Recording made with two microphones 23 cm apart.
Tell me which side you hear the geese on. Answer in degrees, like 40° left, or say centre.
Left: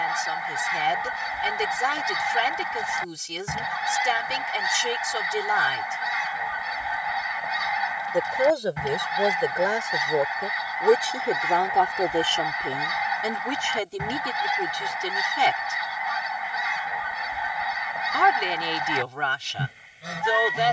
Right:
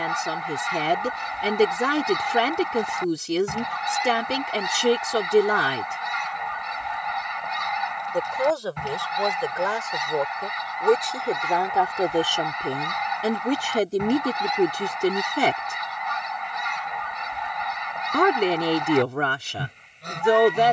centre.